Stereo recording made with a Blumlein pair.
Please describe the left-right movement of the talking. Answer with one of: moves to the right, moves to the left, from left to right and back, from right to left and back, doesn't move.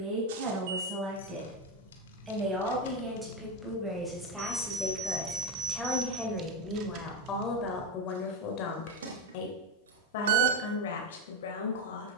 moves to the left.